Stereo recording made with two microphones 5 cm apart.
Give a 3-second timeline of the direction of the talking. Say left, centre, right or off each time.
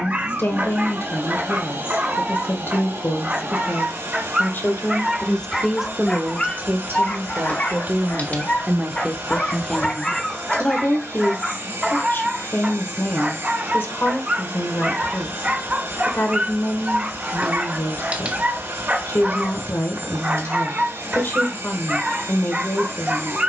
left, left, right, left, left, left, left, left.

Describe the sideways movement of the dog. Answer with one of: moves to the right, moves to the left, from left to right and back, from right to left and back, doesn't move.
from right to left and back.